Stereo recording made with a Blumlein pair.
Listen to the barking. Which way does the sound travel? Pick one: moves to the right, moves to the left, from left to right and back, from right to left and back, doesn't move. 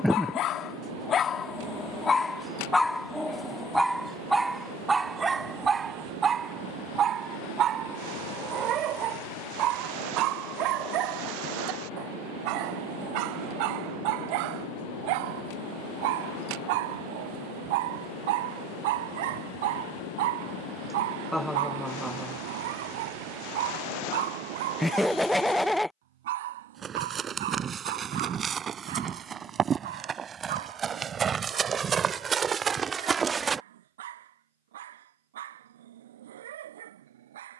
moves to the right.